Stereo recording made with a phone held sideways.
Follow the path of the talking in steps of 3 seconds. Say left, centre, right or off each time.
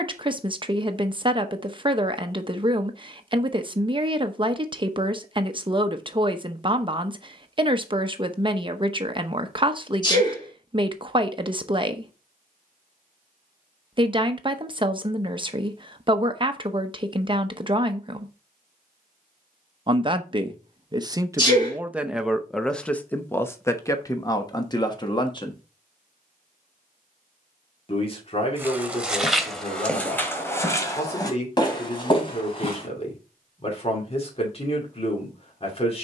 right, right, right, right, right, right, right, centre, left, left, left, left.